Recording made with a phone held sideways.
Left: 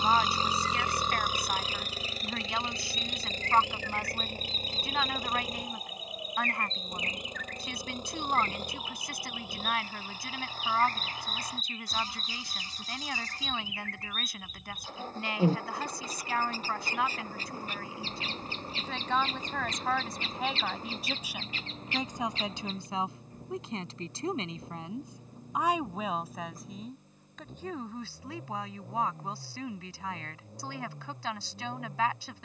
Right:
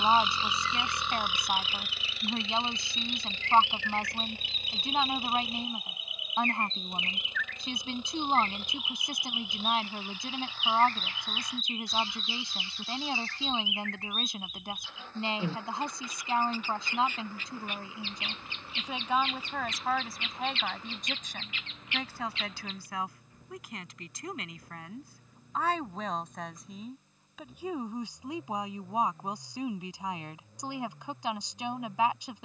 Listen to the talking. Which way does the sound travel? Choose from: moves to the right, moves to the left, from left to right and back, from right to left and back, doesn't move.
from right to left and back.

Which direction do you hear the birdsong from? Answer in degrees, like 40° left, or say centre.
40° left.